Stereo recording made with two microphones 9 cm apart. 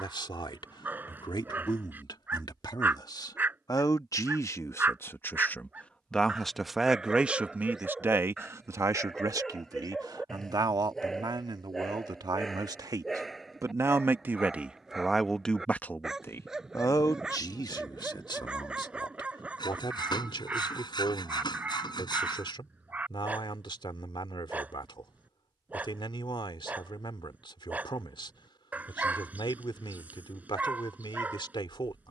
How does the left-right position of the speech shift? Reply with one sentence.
In this clip you hear the speech move from left to right and back again.